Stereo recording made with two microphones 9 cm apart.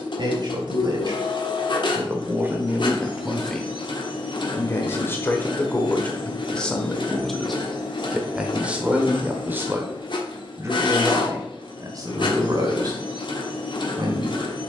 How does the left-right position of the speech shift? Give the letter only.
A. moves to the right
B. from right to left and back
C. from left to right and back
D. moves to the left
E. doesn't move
B.